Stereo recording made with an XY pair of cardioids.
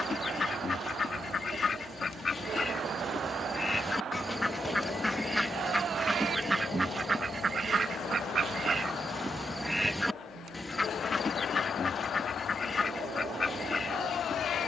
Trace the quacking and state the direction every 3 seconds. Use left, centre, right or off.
left, centre, right, centre, left.